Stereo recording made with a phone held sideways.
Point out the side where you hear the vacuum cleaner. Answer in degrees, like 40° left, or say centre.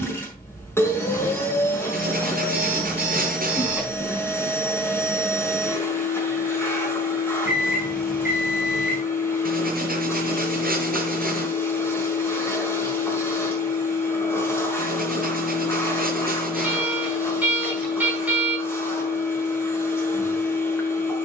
20° left.